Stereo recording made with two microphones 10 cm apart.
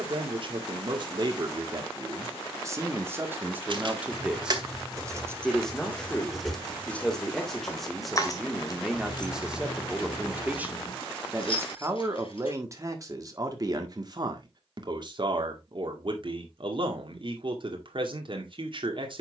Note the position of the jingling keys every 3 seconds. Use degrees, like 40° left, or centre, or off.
off, 30° right, 20° left, 50° left, 60° left, off, off.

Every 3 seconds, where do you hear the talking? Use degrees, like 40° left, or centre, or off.
40° right, 10° right, centre, 10° right, 40° right, 50° right, 50° right.